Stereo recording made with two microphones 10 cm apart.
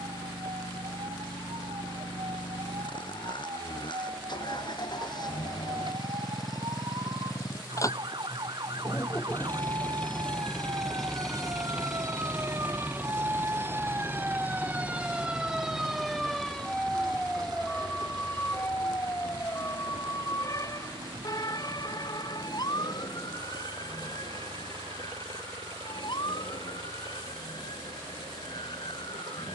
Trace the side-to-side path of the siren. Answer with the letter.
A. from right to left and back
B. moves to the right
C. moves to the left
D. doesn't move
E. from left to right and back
C.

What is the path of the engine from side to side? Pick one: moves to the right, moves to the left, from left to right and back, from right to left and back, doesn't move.
moves to the right.